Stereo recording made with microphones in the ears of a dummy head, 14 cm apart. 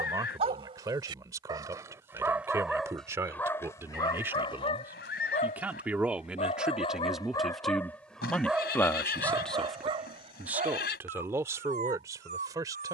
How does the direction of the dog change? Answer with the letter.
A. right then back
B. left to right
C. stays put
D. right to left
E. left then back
E.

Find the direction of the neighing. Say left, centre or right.
left.